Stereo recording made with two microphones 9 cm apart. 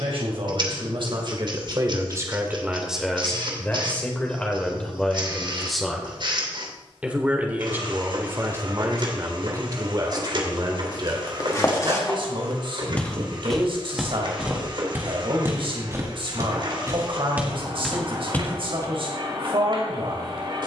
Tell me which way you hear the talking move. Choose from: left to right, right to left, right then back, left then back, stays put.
left then back.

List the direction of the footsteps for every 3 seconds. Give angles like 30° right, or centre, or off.
off, off, off, 40° left, centre, 20° right, 20° left.